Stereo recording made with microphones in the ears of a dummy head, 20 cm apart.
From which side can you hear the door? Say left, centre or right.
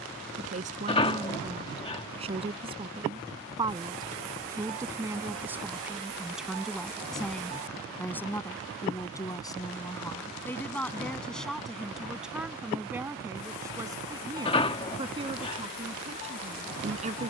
left.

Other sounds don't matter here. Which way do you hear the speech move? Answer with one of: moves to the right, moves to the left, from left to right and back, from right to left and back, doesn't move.
from right to left and back.